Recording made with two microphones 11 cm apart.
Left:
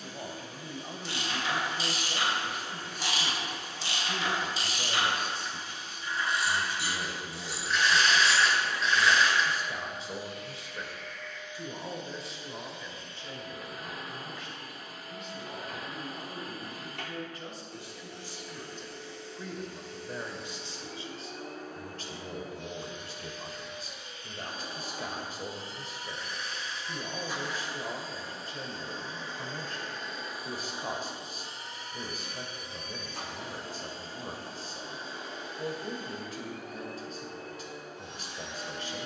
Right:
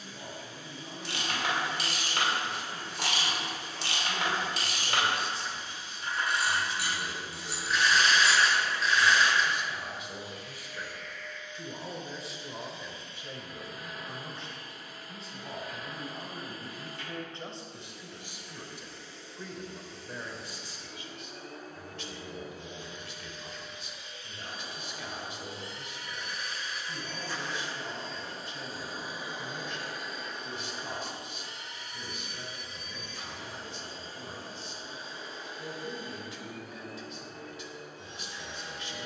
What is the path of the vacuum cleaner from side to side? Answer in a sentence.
You can hear the vacuum cleaner go right and come back.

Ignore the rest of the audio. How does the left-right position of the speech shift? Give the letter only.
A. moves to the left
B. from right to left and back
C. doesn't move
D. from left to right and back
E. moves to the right
D.